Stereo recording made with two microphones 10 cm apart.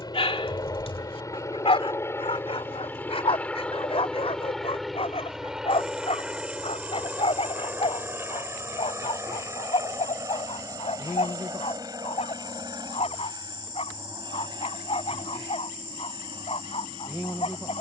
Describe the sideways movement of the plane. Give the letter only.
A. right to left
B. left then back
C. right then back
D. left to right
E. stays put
D.